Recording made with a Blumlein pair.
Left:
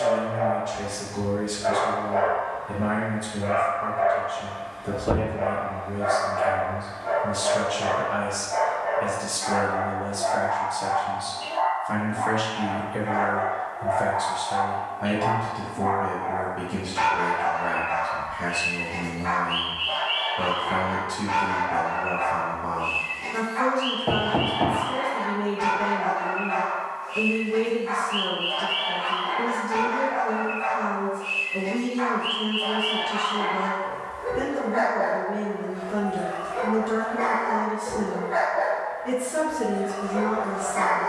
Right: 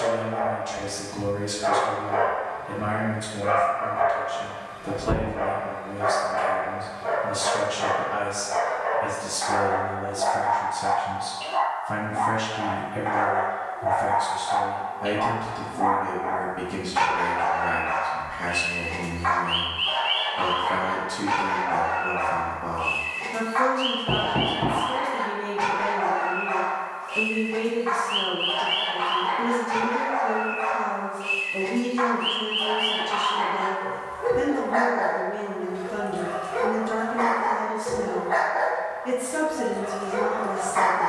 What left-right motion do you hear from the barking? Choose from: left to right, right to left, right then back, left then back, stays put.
stays put.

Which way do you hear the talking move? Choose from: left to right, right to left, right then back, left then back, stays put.
left then back.